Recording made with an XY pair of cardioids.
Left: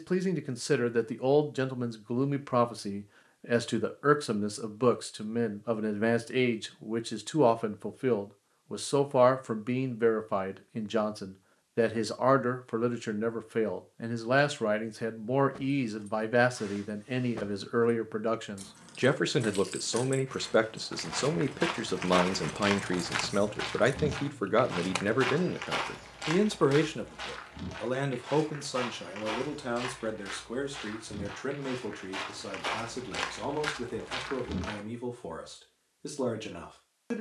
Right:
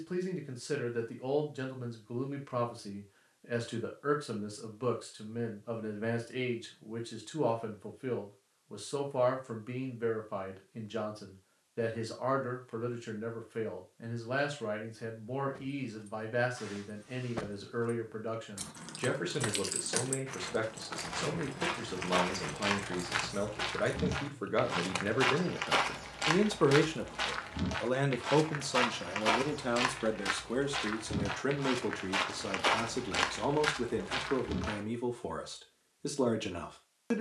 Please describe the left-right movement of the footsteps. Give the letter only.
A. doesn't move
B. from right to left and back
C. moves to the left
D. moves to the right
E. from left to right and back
E.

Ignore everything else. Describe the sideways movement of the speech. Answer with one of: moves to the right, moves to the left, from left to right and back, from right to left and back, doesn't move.
moves to the right.